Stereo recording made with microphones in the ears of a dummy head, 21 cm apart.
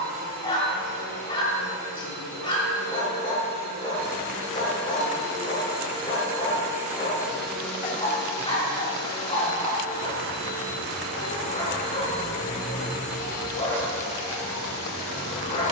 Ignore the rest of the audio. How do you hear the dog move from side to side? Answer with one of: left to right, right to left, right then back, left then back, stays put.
stays put.